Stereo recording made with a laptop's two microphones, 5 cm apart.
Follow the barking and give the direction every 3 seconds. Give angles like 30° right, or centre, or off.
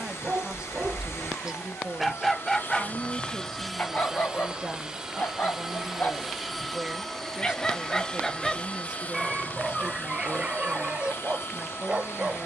20° right, 40° left, 20° left, 20° right.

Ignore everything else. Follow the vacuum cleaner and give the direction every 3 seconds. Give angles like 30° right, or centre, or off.
60° left, 10° right, 10° left, 50° left.